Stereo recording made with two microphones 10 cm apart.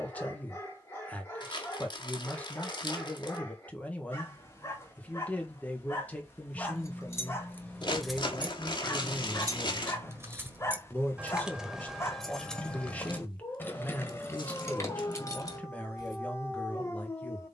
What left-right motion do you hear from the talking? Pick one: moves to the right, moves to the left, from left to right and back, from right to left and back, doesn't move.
doesn't move.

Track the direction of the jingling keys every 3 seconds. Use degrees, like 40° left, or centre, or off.
off, off, 20° left, 20° right, 20° left, 40° left.